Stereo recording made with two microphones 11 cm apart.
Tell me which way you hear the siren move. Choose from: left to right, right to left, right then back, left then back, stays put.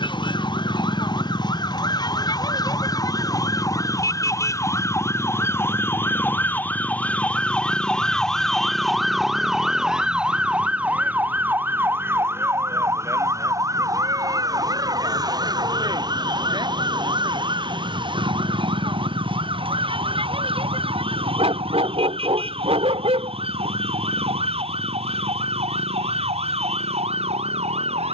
left to right.